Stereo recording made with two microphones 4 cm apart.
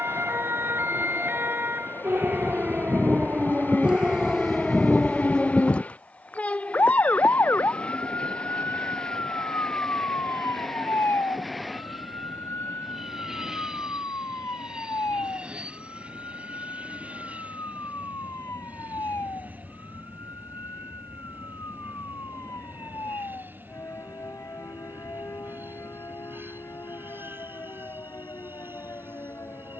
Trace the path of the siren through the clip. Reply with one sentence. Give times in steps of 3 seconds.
In this clip you hear the siren on the right from 0 s, in the centre from 3 s and on the left from 6 s.